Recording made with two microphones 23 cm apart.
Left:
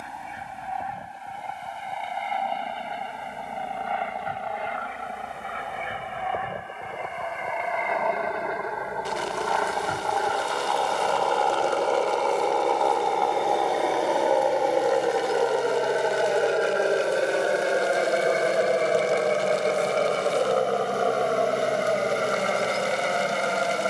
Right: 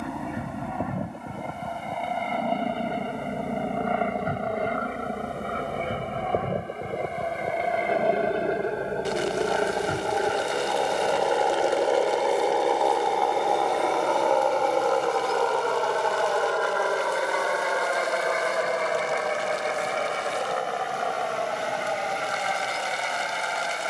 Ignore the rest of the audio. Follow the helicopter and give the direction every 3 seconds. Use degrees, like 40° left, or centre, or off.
60° right, 50° right, 40° right, 20° right, centre, 20° left, 30° left, 40° left.